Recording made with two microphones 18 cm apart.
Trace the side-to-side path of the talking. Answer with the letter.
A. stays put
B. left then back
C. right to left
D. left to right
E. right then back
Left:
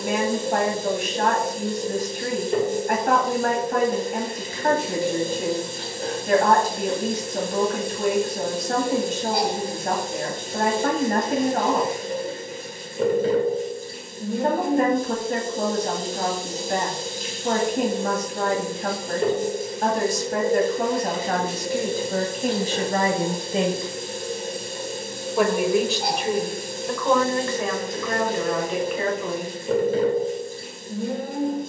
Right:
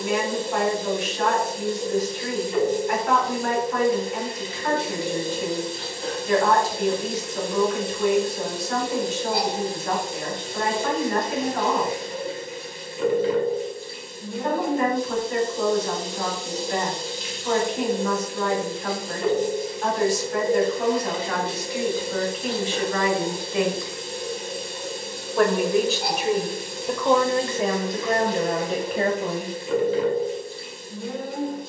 D.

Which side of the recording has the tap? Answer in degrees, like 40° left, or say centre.
50° left.